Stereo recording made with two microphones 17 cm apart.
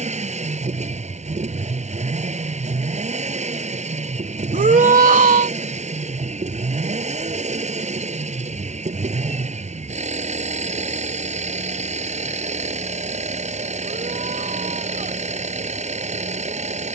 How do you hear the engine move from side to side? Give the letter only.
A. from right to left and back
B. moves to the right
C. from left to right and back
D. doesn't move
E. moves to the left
D.